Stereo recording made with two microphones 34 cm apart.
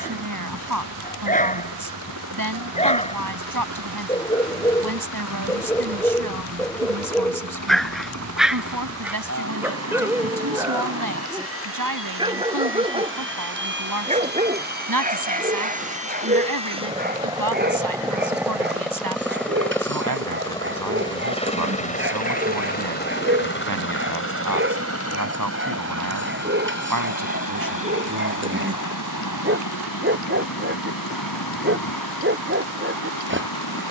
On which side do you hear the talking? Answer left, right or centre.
right.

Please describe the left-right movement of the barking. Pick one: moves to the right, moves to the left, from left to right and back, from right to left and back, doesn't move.
moves to the right.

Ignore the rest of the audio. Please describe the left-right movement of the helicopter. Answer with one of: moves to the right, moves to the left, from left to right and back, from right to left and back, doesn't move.
moves to the left.